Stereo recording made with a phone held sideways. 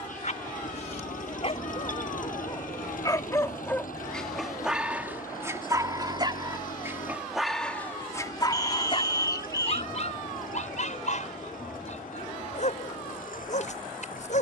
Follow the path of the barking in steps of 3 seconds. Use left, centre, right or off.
left, centre, centre, left, left.